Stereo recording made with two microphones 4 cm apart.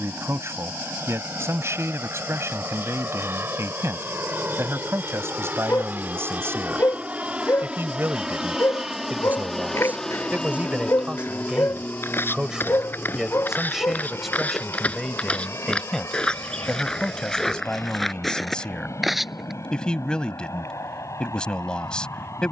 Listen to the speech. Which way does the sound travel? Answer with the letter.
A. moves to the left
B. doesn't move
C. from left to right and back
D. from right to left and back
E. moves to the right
A.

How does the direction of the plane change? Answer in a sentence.
In this clip you hear the plane move from right to left.